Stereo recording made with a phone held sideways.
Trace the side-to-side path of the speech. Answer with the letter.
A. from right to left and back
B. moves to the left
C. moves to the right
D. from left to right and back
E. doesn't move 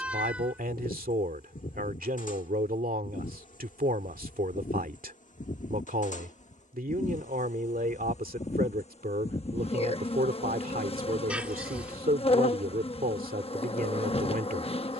E.